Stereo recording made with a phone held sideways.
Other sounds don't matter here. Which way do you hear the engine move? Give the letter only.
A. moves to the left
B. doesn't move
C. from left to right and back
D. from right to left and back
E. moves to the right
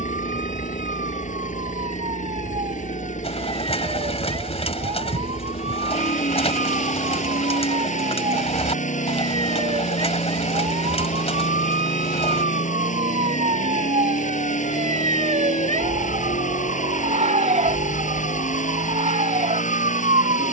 B.